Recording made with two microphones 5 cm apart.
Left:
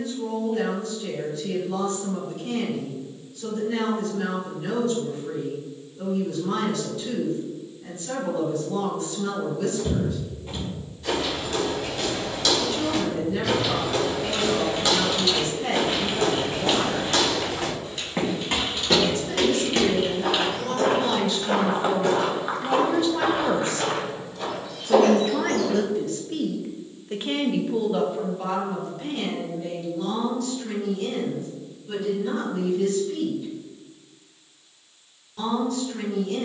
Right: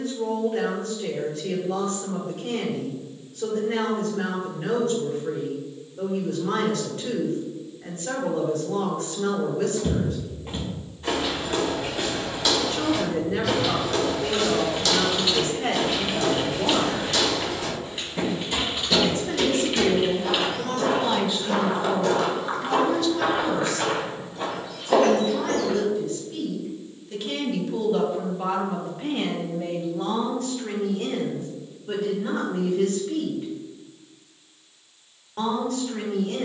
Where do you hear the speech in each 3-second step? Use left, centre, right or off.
right, right, right, right, right, right, right, centre, left, centre, right, right.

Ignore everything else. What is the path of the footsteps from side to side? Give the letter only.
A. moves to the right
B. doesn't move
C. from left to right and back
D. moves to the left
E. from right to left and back
E.